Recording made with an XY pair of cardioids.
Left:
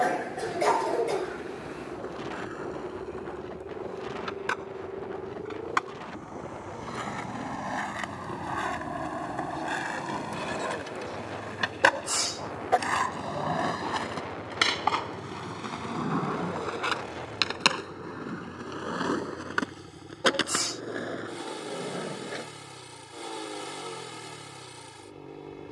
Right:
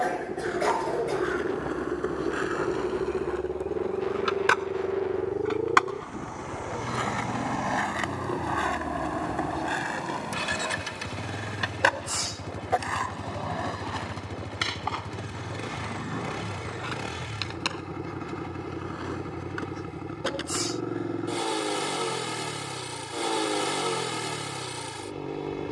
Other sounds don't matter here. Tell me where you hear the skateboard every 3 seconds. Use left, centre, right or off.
right, right, right, centre, left, left, left, left, off.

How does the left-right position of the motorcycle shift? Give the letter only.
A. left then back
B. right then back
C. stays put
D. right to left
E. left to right
C.